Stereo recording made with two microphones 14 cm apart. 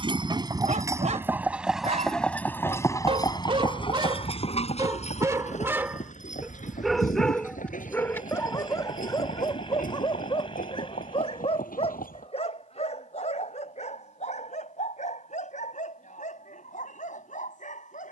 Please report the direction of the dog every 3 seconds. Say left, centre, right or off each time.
right, right, centre, left, left, left.